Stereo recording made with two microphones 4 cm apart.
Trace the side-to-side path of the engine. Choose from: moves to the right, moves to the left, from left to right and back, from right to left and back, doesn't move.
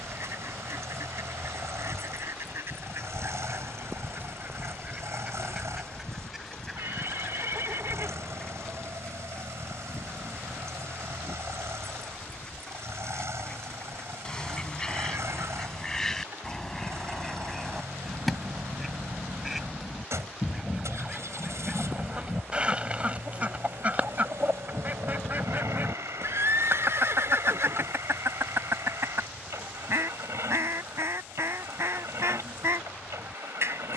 doesn't move.